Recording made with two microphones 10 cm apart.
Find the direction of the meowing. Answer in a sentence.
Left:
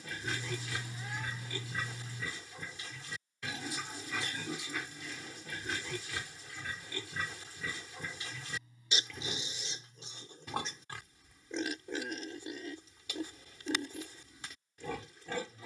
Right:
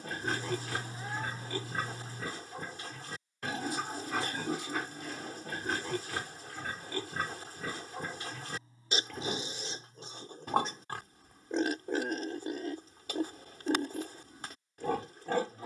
In this clip you hear the meowing on the right.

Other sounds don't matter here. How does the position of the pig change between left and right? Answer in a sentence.
In this clip you hear the pig stay in one place.